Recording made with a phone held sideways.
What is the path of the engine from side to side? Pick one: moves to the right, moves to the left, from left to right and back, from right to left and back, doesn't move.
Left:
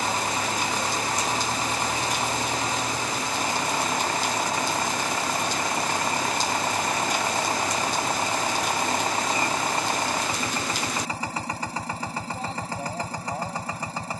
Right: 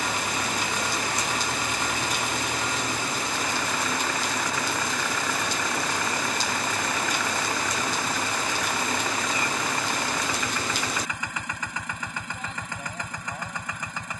doesn't move.